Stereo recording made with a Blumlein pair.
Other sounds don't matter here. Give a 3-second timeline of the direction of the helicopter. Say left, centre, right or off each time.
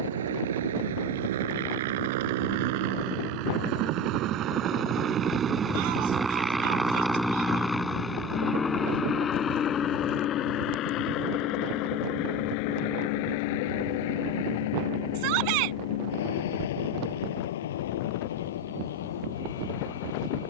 right, right, centre, left, left, left, left.